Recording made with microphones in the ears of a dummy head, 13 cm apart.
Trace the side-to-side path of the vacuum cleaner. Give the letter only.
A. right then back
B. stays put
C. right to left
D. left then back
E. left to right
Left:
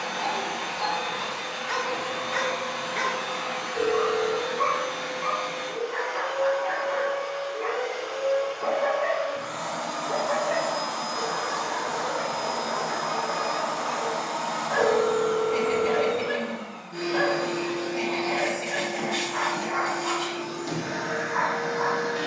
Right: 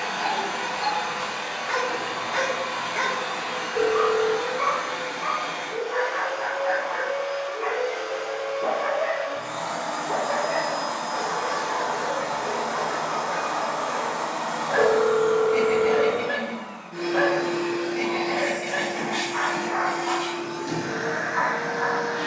C.